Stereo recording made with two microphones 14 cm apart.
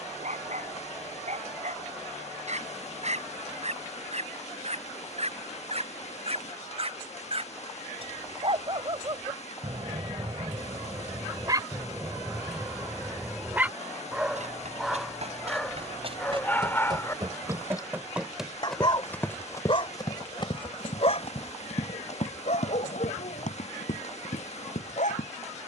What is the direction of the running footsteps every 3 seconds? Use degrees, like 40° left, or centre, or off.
off, off, off, off, 60° right, 40° right, 20° left, 50° left, 70° left.